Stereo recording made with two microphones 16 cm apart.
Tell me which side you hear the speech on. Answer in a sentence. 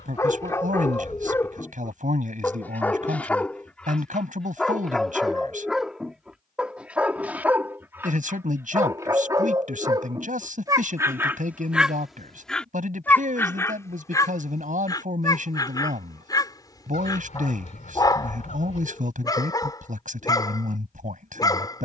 You can hear the speech on the right.